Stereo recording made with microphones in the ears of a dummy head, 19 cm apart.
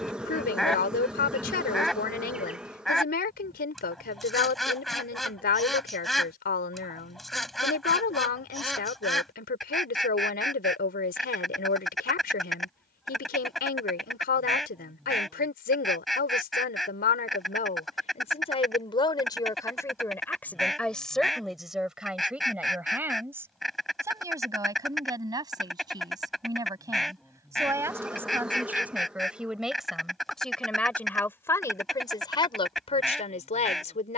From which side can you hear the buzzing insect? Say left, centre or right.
centre.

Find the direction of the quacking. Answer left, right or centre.
centre.